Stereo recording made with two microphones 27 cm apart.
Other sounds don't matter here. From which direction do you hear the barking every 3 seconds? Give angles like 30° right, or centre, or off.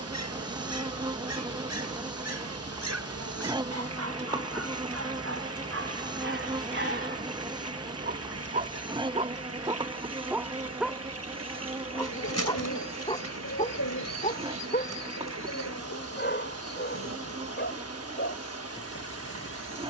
70° right, 60° right, 40° right, 10° right, 20° left, 40° left, 50° left.